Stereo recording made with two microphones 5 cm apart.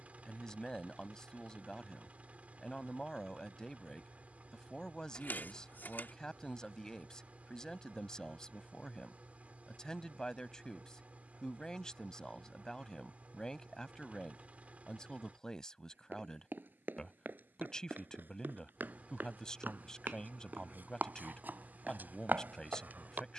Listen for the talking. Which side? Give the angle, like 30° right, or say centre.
10° left.